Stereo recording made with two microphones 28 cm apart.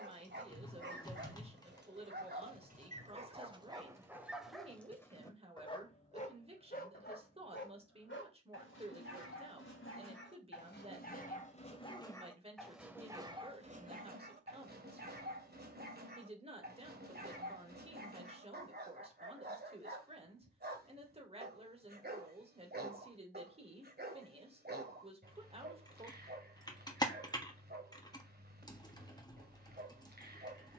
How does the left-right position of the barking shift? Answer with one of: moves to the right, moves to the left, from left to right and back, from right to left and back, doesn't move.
from right to left and back.